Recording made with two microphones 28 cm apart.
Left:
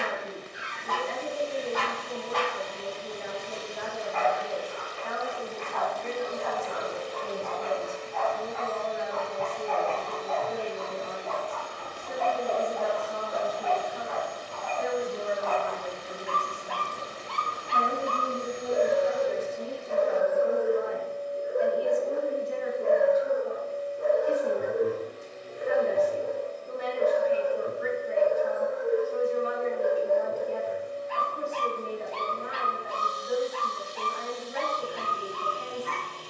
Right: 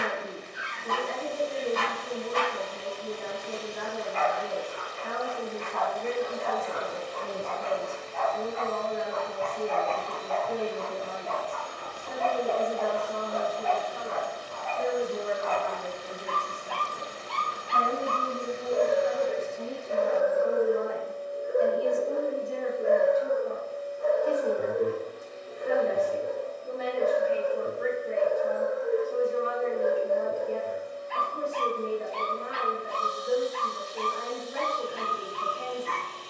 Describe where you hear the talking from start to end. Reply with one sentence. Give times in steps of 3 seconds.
You can hear the talking on the right from 0 s, in the centre from 15 s, on the left from 18 s and on the right from 21 s.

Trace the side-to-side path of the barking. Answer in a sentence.
In this clip you hear the barking go right and come back.